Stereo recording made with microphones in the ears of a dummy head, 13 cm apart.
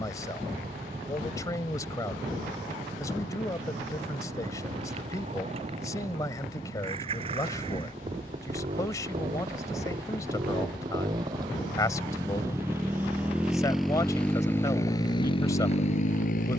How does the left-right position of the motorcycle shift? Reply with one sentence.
You can hear the motorcycle travel towards the left.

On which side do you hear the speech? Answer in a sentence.
In this clip you hear the speech on the left.